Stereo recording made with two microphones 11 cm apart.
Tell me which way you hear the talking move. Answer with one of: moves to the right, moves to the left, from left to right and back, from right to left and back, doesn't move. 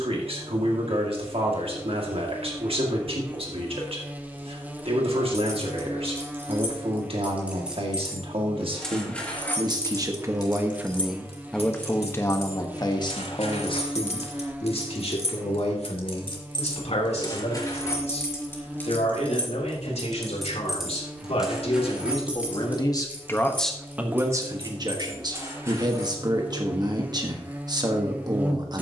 from right to left and back.